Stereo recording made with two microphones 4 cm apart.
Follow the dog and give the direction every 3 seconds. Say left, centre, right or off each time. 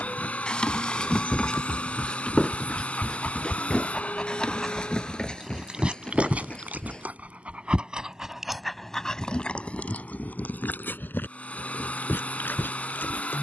left, centre, right, left, left.